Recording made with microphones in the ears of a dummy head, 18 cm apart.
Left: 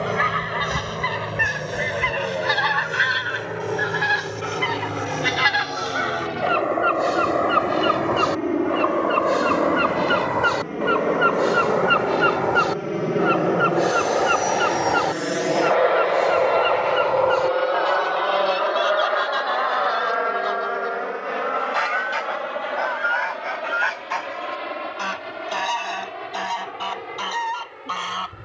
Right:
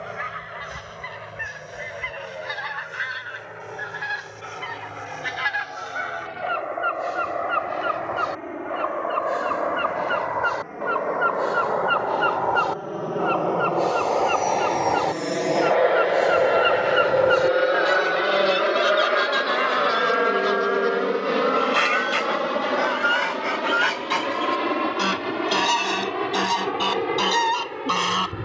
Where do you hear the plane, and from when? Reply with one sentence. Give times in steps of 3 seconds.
In this clip you hear the plane on the left from 0 s, in the centre from 15 s and on the right from 18 s.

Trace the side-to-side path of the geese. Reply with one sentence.
You can hear the geese travel towards the right.